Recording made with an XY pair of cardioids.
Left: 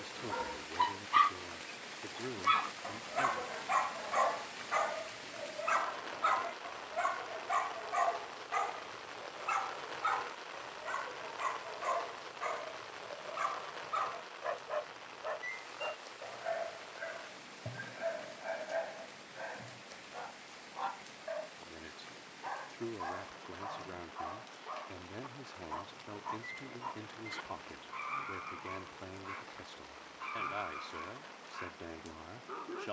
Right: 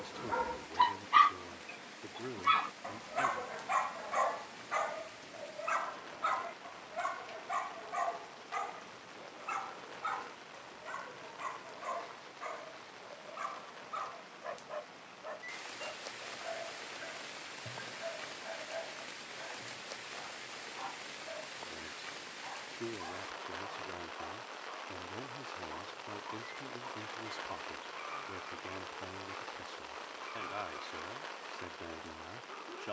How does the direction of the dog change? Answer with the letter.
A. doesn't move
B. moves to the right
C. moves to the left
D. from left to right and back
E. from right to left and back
C.